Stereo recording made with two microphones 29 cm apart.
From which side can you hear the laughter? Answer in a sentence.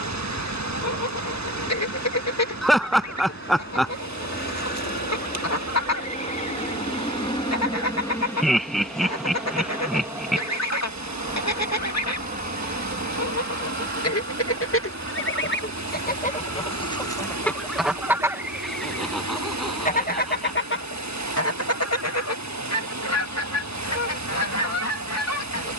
In this clip you hear the laughter in the centre.